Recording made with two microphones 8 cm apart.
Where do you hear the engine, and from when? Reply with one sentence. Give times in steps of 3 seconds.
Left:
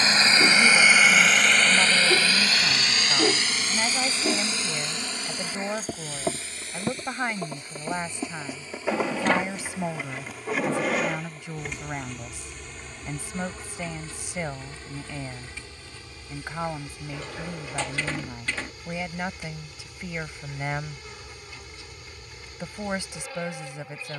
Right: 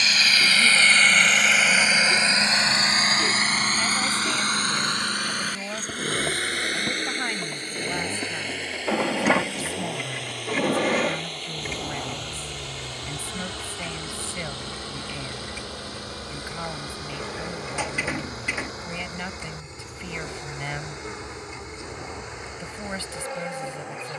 You can hear the engine in the centre from 0 s and on the right from 3 s.